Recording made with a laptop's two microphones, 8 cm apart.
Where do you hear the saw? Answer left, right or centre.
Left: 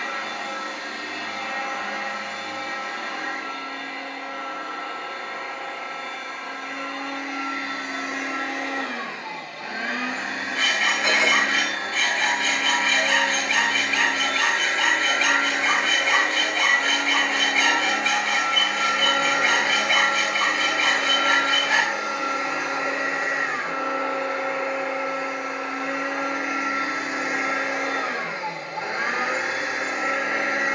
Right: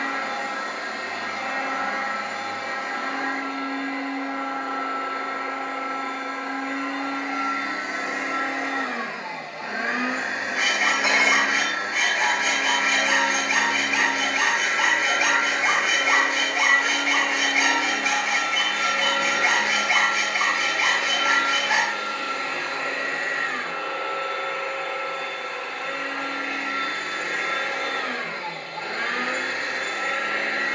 centre.